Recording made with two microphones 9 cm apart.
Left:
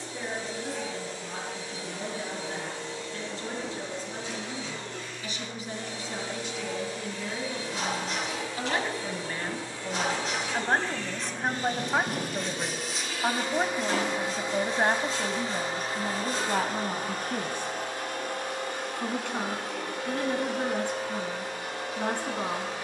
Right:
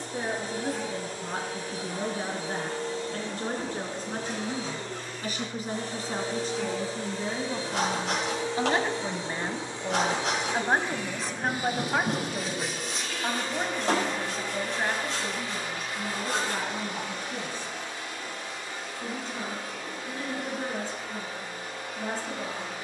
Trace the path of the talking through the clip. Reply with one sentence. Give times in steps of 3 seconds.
You can hear the talking on the right from 0 s, in the centre from 9 s and on the left from 12 s.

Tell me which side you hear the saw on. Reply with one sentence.
You can hear the saw on the right.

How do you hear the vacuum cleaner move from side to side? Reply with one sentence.
You can hear the vacuum cleaner go from the right side to the left.